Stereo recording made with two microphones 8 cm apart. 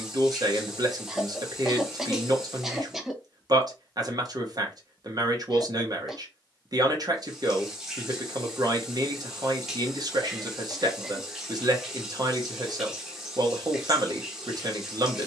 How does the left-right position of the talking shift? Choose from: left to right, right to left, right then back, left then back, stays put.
stays put.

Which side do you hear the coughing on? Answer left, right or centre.
centre.